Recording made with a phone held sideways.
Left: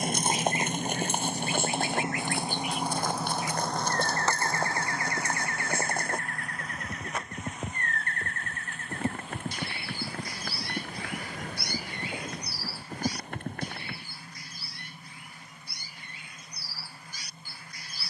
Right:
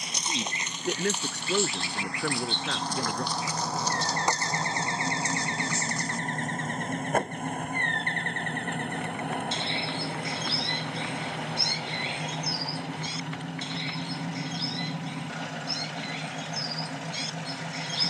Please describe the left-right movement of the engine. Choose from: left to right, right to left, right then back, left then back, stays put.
left to right.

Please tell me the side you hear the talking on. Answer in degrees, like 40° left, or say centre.
80° right.